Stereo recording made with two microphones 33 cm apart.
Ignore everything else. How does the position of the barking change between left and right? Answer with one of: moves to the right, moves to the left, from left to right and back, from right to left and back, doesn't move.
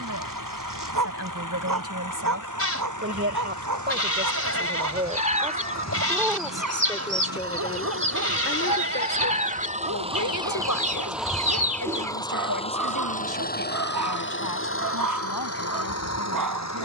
doesn't move.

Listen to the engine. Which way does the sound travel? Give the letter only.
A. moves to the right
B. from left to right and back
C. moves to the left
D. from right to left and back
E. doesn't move
C.